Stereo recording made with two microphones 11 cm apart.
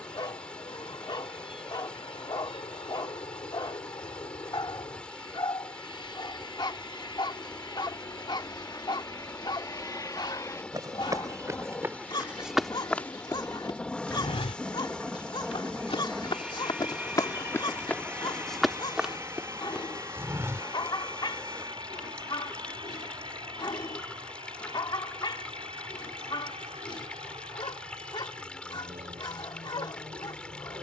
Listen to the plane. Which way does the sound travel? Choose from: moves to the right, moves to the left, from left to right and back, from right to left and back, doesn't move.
moves to the right.